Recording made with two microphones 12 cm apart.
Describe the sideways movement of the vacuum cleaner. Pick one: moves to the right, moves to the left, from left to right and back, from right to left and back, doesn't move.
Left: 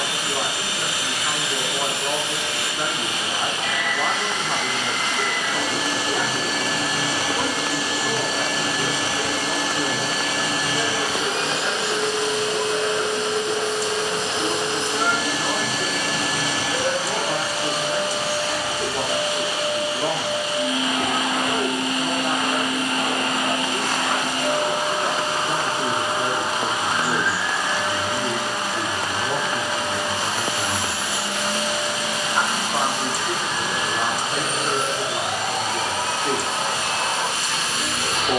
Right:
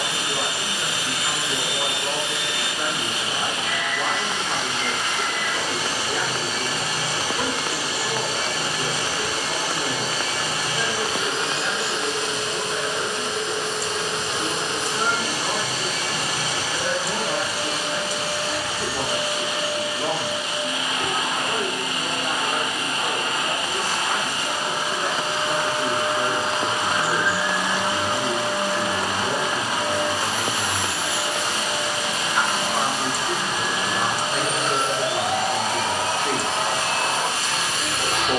moves to the right.